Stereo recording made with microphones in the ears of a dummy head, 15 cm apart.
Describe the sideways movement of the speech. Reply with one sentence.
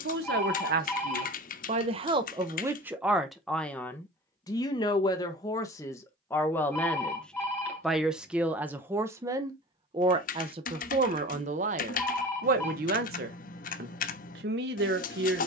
You can hear the speech move from right to left and back again.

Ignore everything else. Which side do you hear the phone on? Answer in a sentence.
You can hear the phone in the centre.